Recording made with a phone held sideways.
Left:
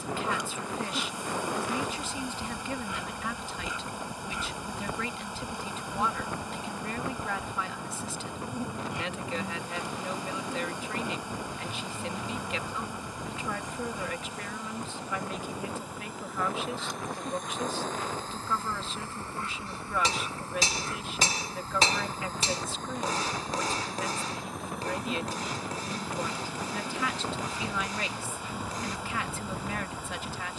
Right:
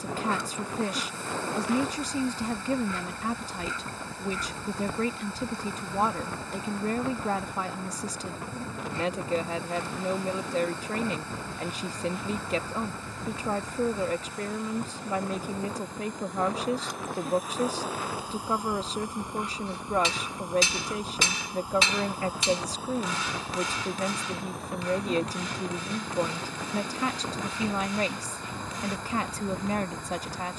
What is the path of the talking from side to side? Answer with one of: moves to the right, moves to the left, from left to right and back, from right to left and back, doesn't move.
doesn't move.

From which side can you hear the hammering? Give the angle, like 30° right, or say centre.
40° left.